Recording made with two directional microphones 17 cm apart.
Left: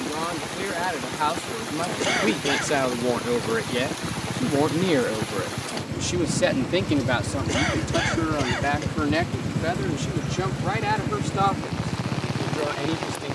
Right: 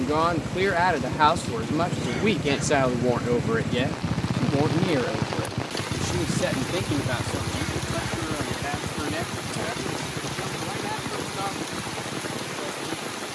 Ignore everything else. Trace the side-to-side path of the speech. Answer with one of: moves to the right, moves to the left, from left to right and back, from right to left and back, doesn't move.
moves to the left.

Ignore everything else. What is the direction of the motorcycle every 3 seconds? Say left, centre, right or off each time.
right, right, centre, left, left.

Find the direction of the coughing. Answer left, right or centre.
left.